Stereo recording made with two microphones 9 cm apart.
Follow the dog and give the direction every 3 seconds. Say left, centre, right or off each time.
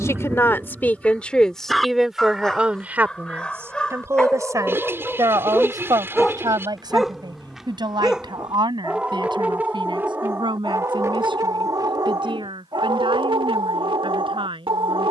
centre, centre, centre, right, right.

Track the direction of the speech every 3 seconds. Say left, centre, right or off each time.
centre, right, right, right, right.